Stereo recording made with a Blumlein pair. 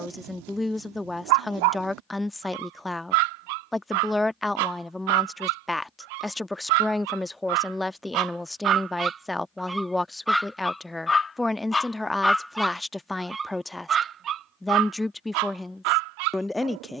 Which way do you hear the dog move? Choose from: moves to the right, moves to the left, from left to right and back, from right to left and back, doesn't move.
from right to left and back.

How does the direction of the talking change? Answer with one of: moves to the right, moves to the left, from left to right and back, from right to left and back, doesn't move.
doesn't move.